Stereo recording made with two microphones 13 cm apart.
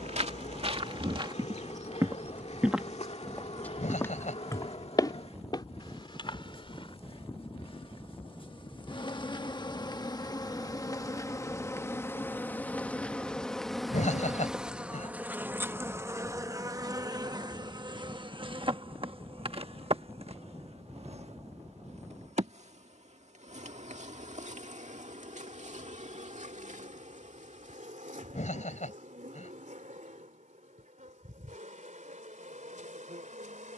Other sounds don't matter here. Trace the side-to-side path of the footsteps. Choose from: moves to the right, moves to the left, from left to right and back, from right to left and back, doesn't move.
moves to the left.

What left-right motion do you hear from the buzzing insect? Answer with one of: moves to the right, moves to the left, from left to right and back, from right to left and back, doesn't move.
moves to the right.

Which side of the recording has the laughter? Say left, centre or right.
left.